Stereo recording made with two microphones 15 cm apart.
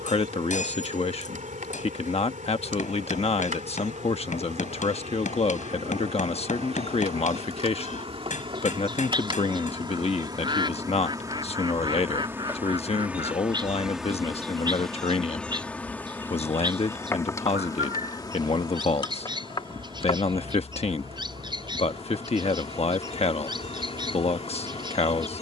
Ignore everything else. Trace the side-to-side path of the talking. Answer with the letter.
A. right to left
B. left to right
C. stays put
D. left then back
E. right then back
C.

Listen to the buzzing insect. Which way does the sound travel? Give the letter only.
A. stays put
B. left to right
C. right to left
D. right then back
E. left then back
C.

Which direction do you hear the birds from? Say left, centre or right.
right.